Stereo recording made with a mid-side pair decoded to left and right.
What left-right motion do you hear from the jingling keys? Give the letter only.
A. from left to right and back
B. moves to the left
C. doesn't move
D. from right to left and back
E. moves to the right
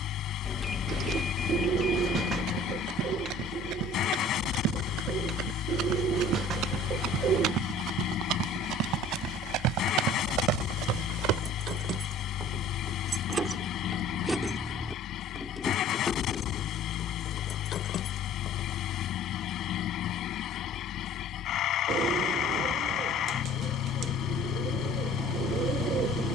B.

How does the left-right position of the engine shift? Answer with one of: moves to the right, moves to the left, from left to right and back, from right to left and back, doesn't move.
doesn't move.